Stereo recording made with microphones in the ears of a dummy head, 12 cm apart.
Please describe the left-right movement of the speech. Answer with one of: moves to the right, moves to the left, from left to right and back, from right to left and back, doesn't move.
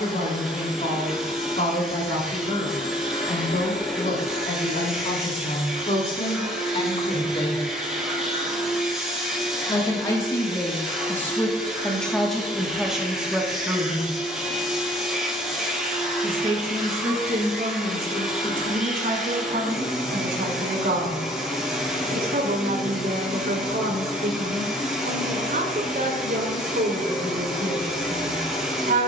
moves to the right.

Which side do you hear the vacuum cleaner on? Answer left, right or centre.
centre.